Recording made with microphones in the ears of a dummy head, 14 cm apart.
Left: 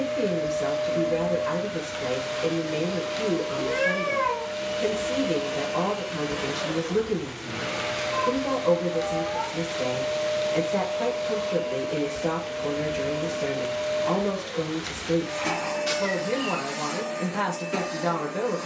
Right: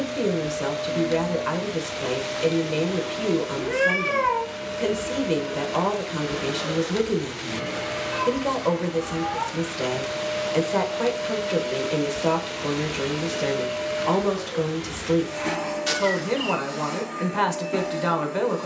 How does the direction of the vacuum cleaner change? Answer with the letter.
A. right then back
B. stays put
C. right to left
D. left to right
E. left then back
A.